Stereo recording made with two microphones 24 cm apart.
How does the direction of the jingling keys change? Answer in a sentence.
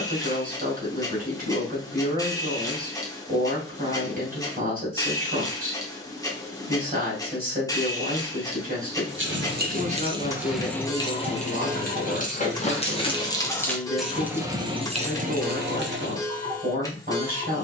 You can hear the jingling keys move from right to left and back again.